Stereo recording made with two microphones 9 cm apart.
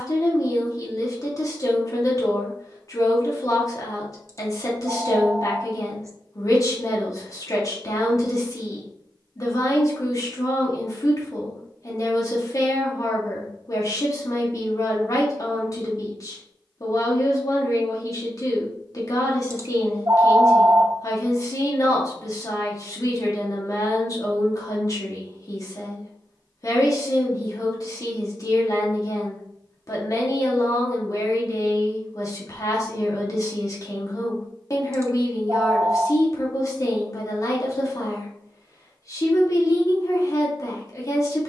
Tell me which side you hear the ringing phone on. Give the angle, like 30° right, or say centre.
40° right.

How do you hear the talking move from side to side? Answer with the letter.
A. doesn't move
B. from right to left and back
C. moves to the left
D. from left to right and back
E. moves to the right
A.